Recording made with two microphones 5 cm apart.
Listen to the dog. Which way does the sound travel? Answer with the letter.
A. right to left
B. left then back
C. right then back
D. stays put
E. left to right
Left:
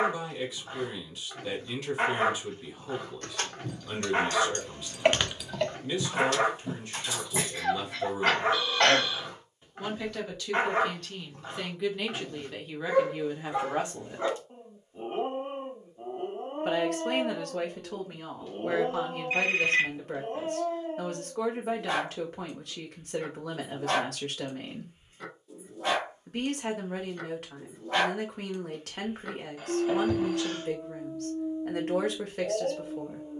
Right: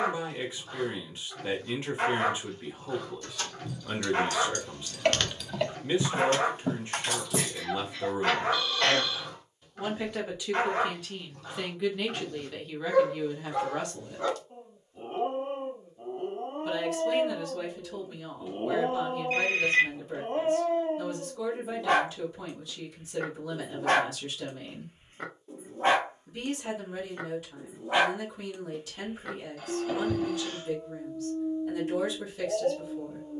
C.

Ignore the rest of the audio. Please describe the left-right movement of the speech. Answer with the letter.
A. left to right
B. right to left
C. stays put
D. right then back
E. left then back
B.